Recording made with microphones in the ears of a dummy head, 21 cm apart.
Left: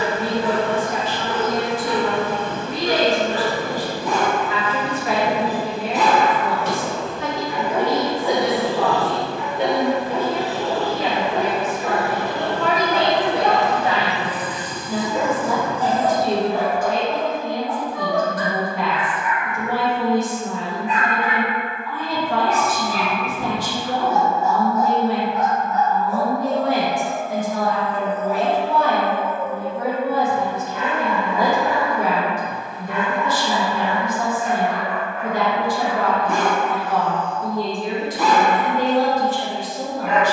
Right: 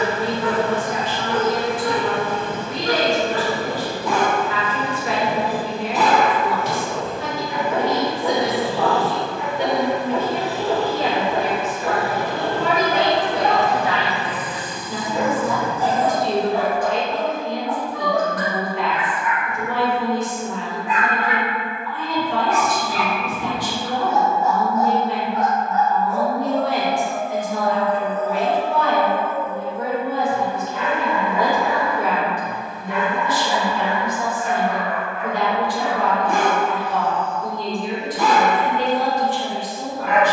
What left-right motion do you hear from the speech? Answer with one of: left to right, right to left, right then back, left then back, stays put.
right then back.